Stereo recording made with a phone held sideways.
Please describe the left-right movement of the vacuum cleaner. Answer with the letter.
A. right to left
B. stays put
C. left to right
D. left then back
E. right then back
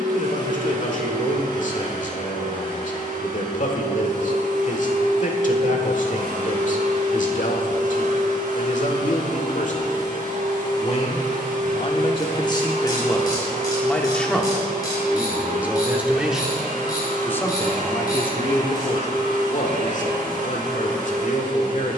B.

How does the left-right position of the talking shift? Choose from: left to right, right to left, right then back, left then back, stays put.
right then back.